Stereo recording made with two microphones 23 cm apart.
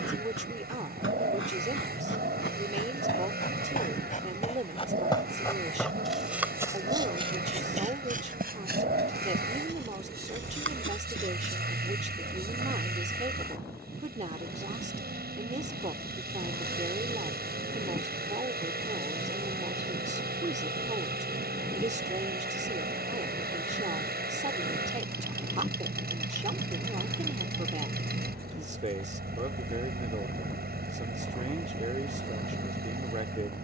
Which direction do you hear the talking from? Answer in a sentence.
In this clip you hear the talking on the right.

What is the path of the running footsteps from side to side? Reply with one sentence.
You can hear the running footsteps go from the left side to the right.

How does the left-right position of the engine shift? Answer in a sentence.
In this clip you hear the engine stay in one place.